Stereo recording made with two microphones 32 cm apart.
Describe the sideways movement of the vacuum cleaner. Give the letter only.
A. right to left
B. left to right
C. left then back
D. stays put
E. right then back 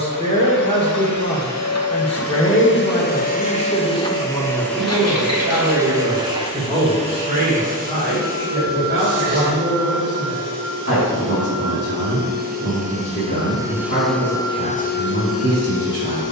E.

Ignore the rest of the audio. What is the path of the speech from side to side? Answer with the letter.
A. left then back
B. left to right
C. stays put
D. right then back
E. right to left
B.